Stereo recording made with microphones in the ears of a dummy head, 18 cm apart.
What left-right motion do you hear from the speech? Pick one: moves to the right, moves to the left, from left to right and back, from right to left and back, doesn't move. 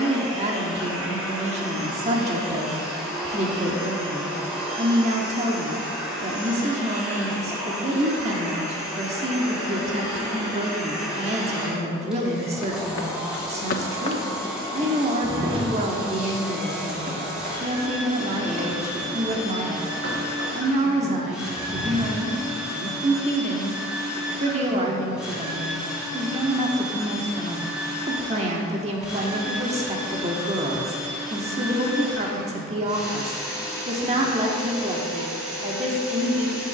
doesn't move.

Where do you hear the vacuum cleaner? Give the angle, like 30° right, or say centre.
centre.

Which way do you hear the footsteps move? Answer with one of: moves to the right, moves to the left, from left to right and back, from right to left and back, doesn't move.
moves to the right.